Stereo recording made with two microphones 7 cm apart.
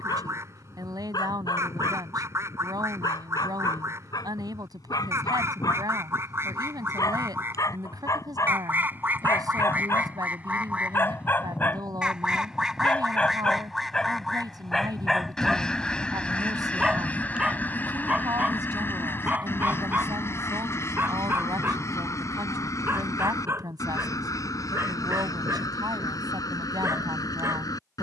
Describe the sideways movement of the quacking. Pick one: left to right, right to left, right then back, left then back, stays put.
right to left.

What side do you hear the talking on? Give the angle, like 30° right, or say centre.
70° right.